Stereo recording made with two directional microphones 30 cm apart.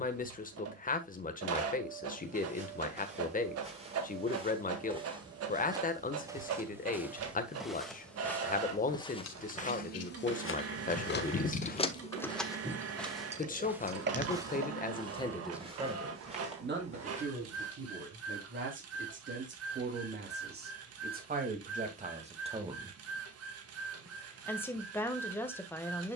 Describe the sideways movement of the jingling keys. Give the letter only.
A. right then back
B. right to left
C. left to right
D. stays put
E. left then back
C.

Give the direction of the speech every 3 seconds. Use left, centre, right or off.
left, left, left, left, left, right, right, right, centre.